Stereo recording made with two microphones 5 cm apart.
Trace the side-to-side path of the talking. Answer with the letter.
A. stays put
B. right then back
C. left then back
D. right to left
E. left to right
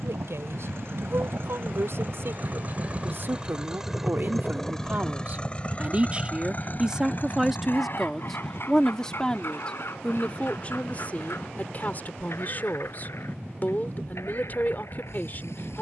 D.